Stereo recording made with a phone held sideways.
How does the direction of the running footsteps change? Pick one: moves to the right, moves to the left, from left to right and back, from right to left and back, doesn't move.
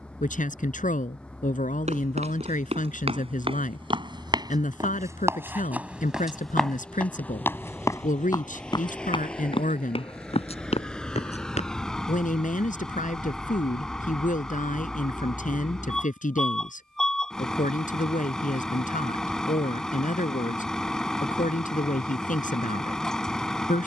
moves to the left.